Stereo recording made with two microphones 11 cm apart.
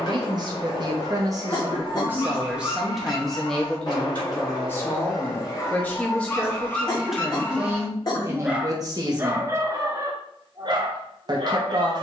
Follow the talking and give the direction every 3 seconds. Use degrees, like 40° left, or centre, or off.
30° right, 10° left, 10° right, 40° right.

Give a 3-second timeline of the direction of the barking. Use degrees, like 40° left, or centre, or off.
40° left, 40° left, 10° left, 40° right.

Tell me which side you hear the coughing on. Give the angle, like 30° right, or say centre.
40° left.